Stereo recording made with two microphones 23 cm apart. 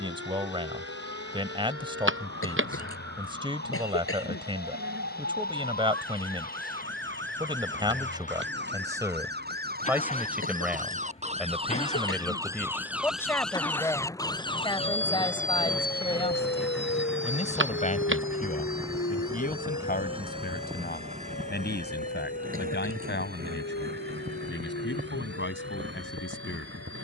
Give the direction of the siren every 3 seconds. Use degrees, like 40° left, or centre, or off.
70° right, 60° right, 50° right, 40° right, centre, 40° left, 70° left, 70° left, 80° left.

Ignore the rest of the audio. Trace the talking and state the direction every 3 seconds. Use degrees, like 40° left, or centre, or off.
20° right, 20° right, 20° right, 10° right, 10° left, 30° left, 40° left, 50° left, 50° left.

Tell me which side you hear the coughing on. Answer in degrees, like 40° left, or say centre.
70° left.